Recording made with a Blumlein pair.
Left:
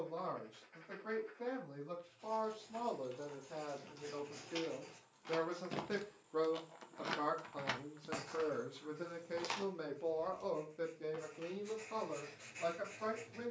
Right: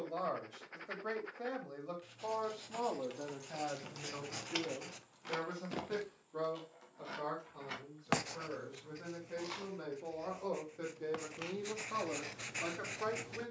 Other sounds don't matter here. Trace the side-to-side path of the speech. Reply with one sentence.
You can hear the speech go left and come back.